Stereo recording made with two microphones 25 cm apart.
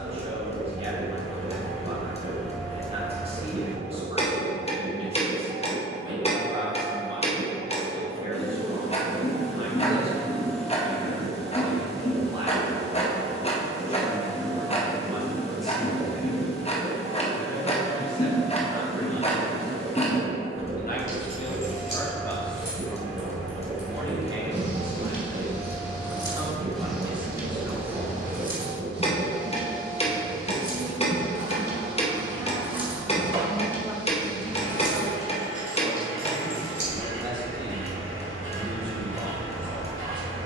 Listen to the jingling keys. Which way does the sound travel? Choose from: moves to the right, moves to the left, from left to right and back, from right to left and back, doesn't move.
from left to right and back.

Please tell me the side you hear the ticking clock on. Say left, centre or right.
left.